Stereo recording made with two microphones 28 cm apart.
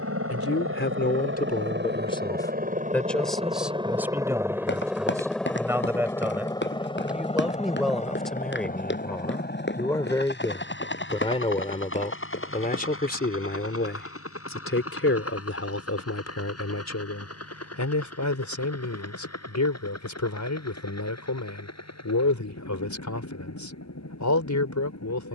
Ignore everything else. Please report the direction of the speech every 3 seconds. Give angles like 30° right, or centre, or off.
30° left, 10° right, centre, 10° left, 40° left, 60° left, 80° left, 80° left, 80° left.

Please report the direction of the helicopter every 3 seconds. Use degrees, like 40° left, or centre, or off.
40° right, 10° right, 20° left, 40° left, 50° left, 50° left, 60° left, 60° left, 60° left.